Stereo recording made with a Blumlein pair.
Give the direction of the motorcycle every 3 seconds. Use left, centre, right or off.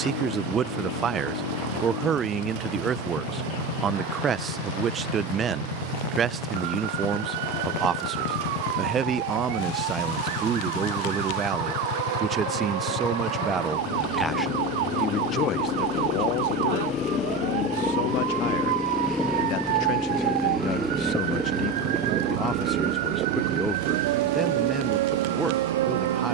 left, left, left, left, left, left, centre, right, right.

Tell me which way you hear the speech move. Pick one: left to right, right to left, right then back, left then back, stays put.
left then back.